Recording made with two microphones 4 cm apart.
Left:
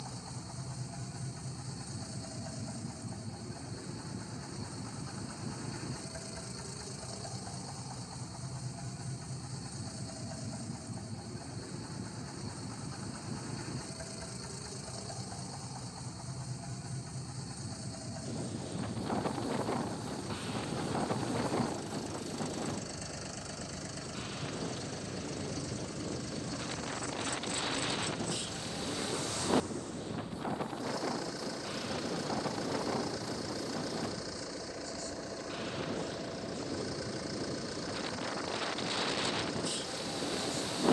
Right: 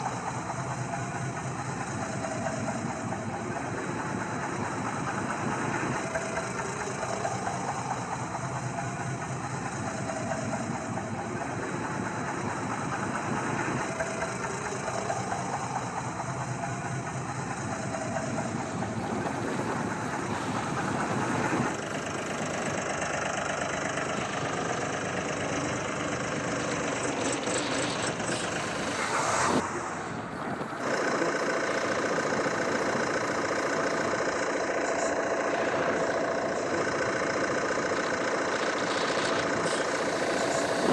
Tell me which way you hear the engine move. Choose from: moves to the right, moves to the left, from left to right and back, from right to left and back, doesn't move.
doesn't move.